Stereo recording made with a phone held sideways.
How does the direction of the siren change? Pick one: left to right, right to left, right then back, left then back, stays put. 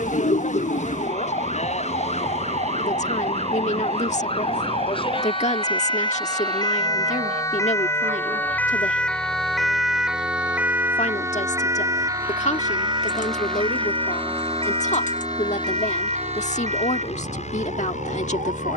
left to right.